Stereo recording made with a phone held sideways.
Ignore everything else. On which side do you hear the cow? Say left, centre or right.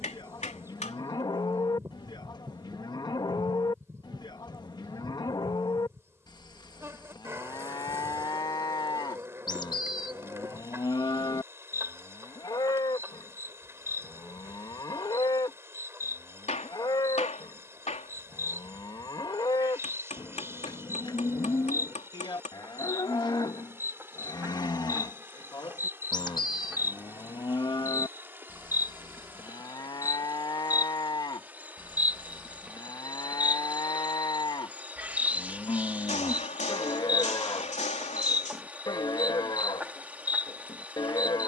left.